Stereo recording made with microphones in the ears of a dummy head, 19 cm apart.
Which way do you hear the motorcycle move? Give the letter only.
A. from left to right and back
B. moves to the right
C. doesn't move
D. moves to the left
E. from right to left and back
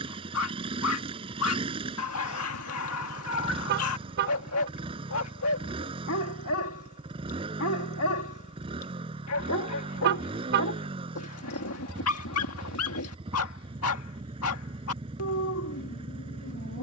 C.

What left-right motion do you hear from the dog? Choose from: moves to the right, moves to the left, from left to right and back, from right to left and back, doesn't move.
doesn't move.